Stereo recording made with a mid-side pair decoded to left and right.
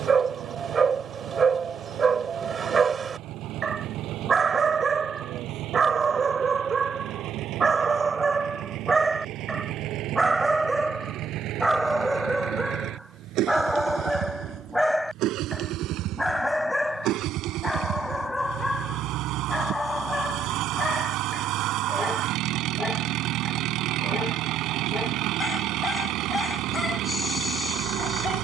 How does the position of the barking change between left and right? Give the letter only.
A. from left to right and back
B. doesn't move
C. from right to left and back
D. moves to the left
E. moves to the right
D.